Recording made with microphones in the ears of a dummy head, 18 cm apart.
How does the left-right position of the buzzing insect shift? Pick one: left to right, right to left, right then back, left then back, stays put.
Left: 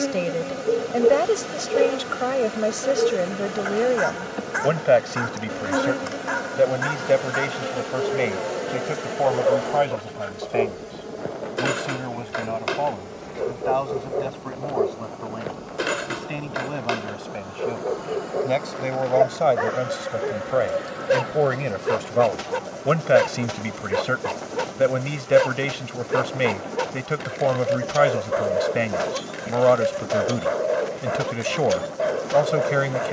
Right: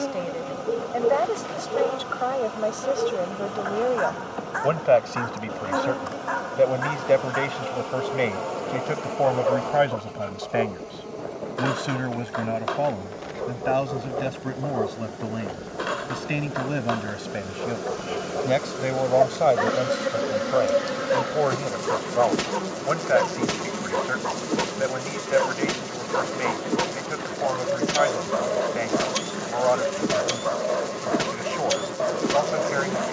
left to right.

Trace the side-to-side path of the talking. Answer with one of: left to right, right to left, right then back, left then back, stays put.
right then back.